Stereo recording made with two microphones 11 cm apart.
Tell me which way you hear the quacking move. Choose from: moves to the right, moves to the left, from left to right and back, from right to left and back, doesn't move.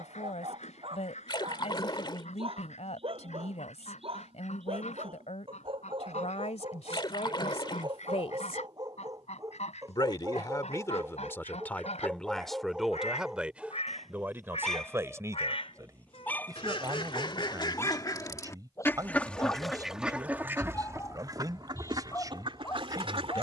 moves to the right.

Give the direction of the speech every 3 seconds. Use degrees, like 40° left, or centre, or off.
80° left, 80° left, 70° left, 30° left, 10° right, 30° right, 30° right, 30° right.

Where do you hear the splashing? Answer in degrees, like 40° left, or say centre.
40° left.